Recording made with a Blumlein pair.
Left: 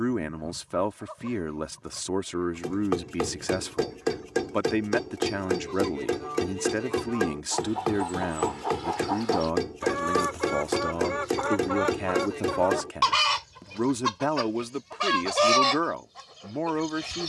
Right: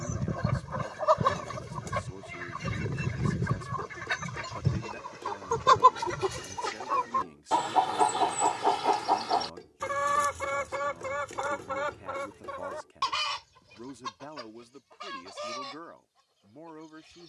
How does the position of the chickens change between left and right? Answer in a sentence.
In this clip you hear the chickens move to the left.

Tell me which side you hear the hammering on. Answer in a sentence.
In this clip you hear the hammering on the left.